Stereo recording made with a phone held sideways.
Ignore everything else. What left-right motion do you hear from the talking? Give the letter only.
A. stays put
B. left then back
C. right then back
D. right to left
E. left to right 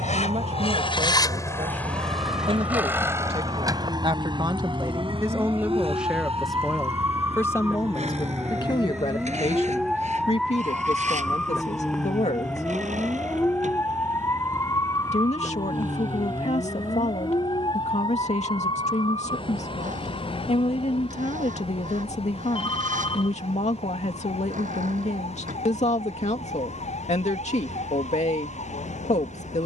D.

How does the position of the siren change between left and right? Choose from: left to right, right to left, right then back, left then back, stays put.
right to left.